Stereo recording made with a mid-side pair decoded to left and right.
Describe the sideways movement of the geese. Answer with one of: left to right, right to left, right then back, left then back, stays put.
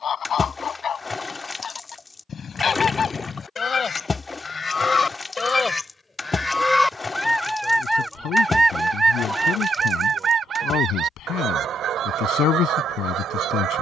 left to right.